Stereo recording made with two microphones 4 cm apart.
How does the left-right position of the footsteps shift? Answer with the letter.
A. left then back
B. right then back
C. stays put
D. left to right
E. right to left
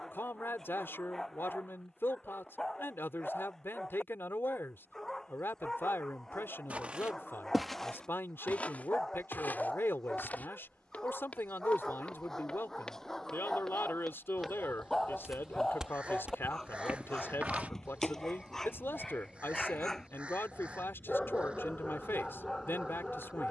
A.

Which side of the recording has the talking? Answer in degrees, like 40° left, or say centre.
70° left.